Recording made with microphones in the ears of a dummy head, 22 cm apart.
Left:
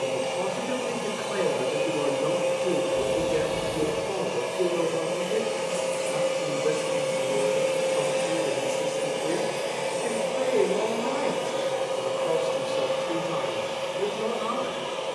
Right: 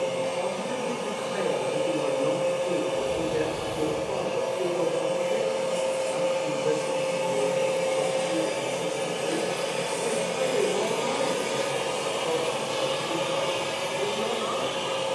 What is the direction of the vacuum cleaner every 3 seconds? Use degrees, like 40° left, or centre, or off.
50° left, 40° left, 20° left, 20° right, 60° right.